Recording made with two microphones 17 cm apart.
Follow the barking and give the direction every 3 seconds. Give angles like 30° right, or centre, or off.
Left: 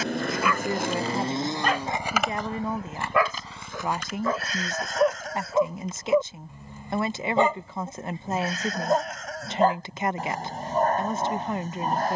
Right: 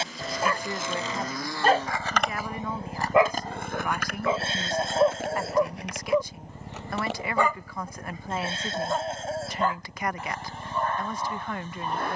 40° right, 10° right, 20° left, 40° left.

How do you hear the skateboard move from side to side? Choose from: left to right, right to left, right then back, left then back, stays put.
left to right.